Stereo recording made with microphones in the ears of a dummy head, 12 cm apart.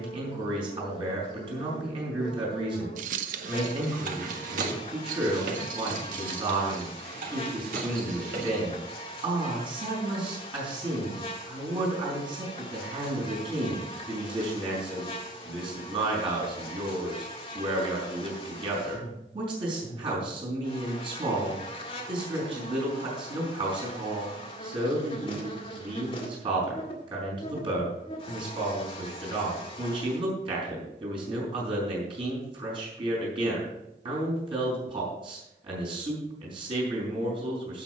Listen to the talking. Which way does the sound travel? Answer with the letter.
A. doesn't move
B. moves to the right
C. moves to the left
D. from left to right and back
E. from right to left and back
A.